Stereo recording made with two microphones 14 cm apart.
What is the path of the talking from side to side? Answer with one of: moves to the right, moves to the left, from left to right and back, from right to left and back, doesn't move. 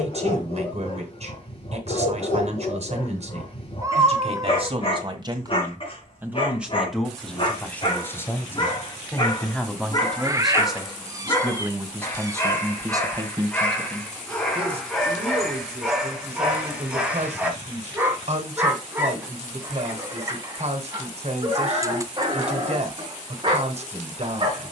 from right to left and back.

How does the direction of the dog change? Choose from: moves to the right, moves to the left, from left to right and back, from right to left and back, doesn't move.
moves to the right.